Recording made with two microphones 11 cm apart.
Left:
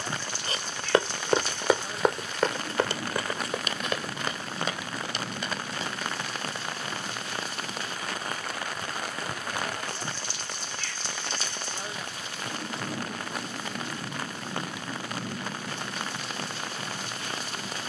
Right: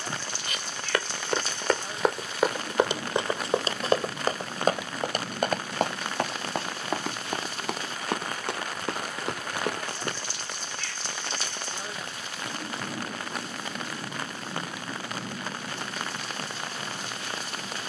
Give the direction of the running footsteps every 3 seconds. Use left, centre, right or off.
centre, right, right, right, off, off.